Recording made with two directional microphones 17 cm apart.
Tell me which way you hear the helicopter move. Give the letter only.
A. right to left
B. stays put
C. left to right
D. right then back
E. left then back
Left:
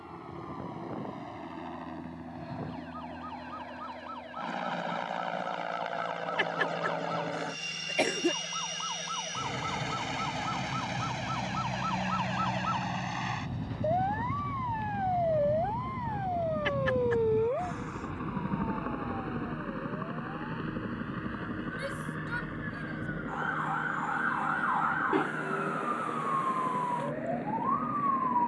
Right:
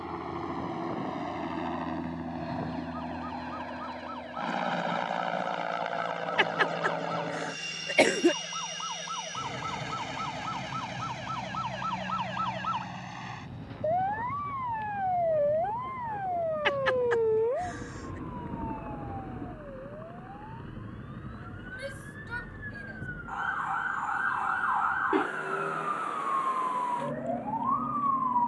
A.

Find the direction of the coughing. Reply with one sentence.
In this clip you hear the coughing on the right.